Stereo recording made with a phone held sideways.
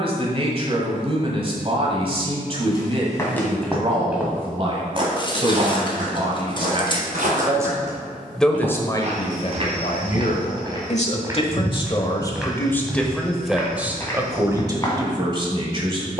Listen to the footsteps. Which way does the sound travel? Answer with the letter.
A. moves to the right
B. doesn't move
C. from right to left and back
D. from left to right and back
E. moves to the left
D.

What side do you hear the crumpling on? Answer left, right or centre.
left.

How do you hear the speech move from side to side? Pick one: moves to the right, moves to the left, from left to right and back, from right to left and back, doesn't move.
from right to left and back.